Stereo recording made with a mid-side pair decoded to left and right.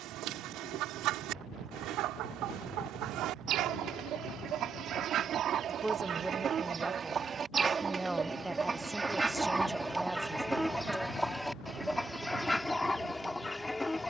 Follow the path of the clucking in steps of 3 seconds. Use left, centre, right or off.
right, right, right, centre, centre.